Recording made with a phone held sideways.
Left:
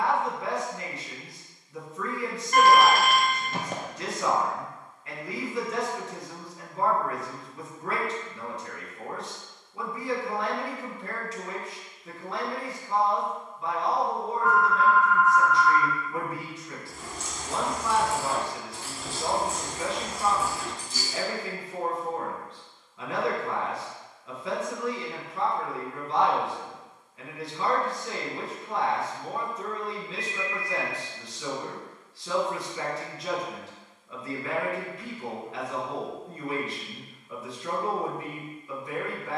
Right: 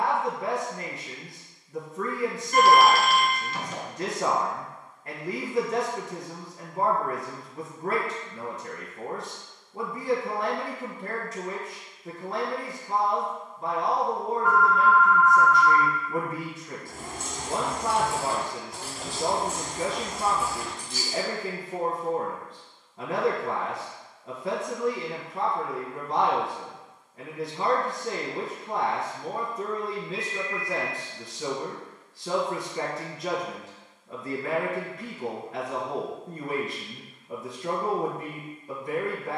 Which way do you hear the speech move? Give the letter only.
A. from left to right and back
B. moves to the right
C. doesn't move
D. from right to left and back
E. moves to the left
C.